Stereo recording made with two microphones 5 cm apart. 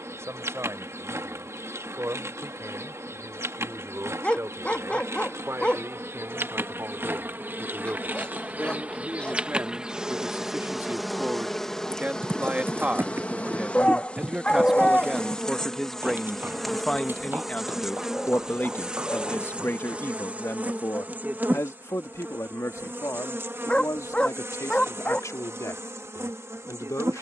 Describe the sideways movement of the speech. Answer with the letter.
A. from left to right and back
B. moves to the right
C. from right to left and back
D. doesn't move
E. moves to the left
E.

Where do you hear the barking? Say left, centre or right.
left.